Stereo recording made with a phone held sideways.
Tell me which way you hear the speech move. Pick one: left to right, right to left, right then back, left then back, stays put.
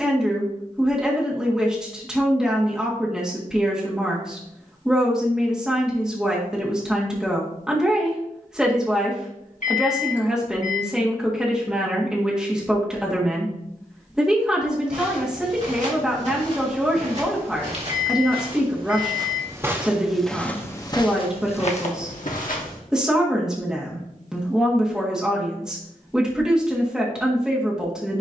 stays put.